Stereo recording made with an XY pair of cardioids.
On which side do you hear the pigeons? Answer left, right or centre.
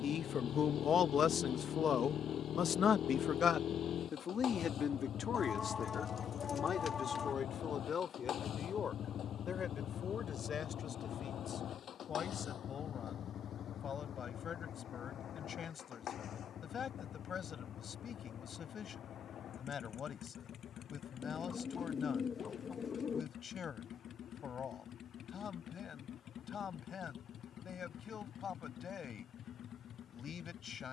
left.